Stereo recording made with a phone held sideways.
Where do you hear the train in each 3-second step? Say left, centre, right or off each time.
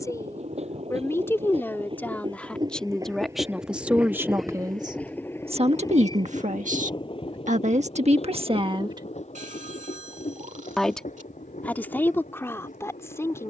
right, centre, left, left, left.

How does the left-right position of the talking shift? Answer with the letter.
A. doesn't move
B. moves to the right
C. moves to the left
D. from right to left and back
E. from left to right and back
E.